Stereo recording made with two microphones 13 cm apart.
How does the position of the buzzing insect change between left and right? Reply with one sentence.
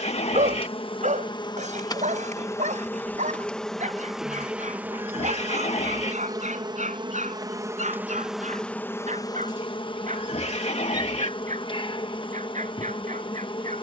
In this clip you hear the buzzing insect move from left to right and back again.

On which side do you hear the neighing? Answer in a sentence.
You can hear the neighing on the left.